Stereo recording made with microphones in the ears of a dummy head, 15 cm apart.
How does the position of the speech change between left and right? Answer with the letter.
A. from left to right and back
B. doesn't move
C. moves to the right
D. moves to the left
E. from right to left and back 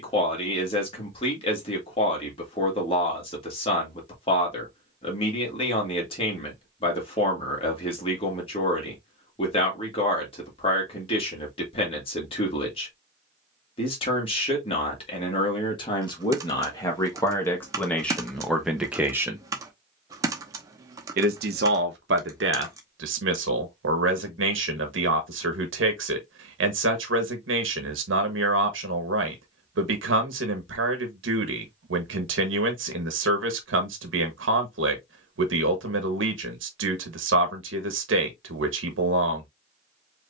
C.